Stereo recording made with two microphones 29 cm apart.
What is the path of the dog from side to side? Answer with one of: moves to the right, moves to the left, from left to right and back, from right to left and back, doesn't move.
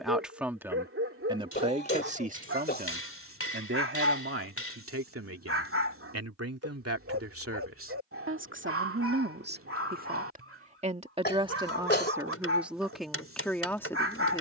doesn't move.